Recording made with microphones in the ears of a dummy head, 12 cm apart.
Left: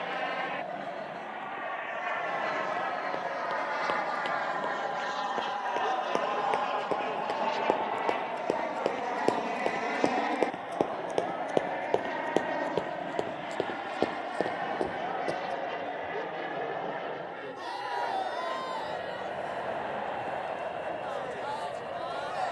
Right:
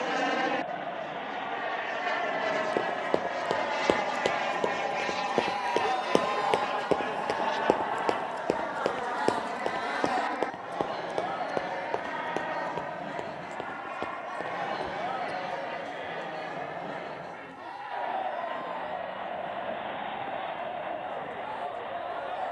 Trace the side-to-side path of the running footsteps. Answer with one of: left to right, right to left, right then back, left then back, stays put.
right to left.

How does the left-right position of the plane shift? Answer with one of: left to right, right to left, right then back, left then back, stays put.
right to left.